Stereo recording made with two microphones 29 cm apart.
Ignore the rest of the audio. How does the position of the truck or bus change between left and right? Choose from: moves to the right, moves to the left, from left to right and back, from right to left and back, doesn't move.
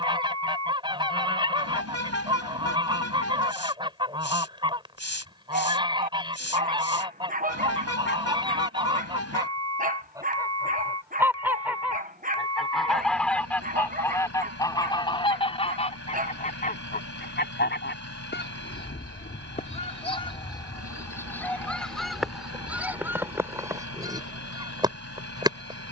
doesn't move.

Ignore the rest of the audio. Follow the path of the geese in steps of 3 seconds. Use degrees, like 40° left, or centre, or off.
20° right, 20° right, 20° right, 10° right, 10° left, 30° left, 20° left, centre, 10° right.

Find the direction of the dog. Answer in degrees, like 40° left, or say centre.
30° right.